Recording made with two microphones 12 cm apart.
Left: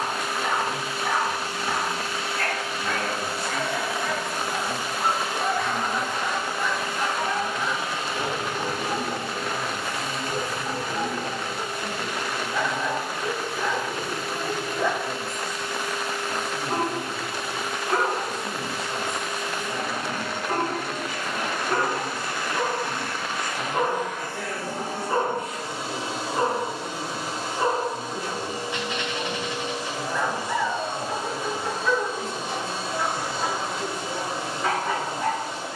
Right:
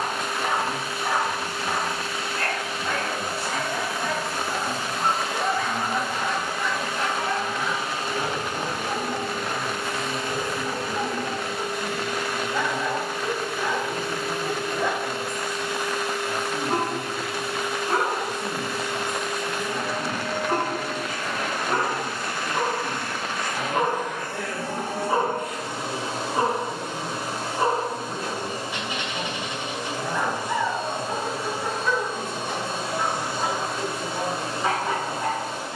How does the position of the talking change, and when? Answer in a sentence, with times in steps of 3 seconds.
In this clip you hear the talking in the centre from 0 s and on the right from 3 s.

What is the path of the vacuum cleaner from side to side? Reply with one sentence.
You can hear the vacuum cleaner move from left to right.